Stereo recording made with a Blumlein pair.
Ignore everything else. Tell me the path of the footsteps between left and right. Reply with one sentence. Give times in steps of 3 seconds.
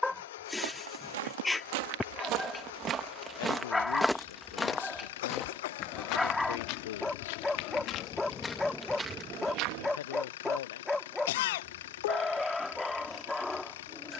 In this clip you hear the footsteps on the right from 0 s, in the centre from 3 s, on the left from 6 s, on the right from 9 s and not at all from 12 s.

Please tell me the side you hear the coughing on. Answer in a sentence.
You can hear the coughing on the left.